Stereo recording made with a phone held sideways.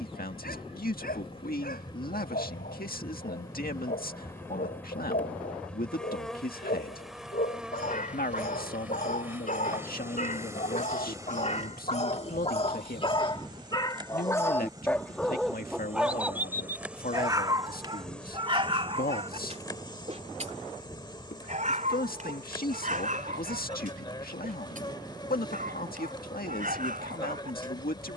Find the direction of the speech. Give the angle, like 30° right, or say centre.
80° left.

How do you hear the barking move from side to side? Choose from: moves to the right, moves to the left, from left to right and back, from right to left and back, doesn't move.
moves to the right.